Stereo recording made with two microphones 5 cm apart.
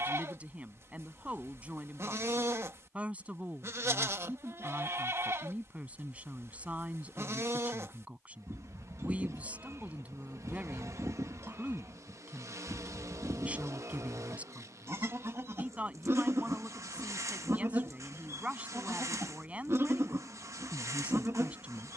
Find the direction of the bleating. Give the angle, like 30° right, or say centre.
50° right.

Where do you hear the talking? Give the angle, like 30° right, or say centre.
20° right.